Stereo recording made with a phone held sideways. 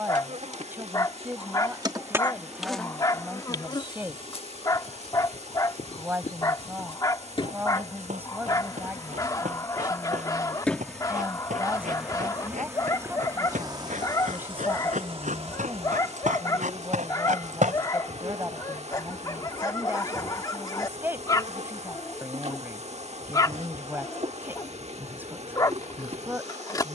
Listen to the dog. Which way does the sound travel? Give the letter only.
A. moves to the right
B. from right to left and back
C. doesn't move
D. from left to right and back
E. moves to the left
C.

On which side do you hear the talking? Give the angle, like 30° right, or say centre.
20° right.